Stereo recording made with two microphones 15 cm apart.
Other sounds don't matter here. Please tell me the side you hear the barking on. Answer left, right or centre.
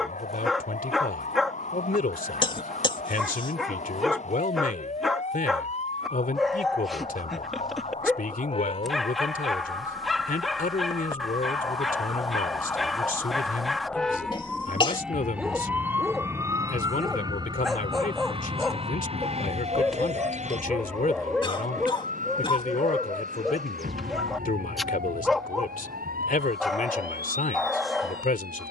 centre.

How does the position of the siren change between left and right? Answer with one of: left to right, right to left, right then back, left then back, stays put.
left to right.